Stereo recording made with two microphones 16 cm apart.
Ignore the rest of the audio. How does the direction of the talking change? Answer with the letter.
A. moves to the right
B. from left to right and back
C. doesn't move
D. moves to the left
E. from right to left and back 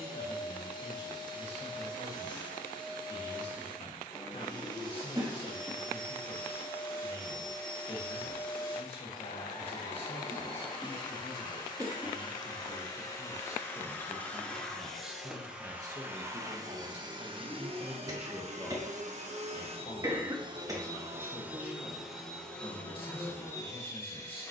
B.